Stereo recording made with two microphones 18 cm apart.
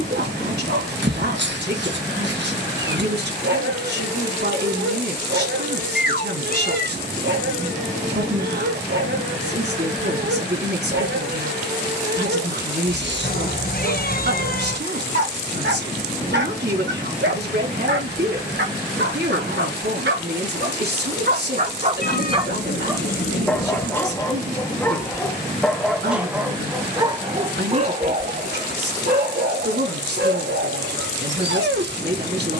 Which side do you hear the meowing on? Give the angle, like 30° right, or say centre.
60° left.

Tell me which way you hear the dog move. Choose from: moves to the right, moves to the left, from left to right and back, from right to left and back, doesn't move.
from right to left and back.